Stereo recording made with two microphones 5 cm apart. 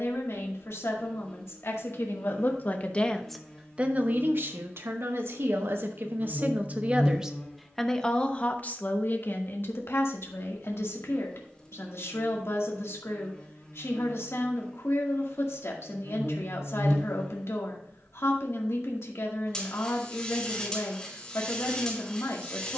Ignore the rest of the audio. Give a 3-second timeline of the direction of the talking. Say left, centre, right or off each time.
left, right, centre, left, left, left, left, left.